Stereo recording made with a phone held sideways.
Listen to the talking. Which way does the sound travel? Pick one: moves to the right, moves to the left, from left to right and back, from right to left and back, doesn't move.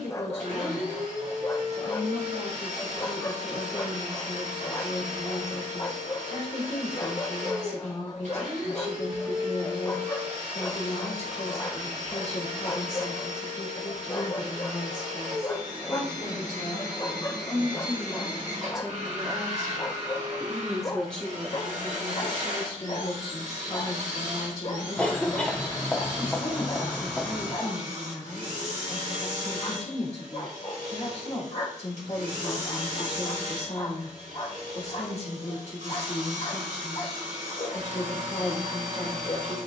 from left to right and back.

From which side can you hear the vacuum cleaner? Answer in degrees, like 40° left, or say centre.
60° right.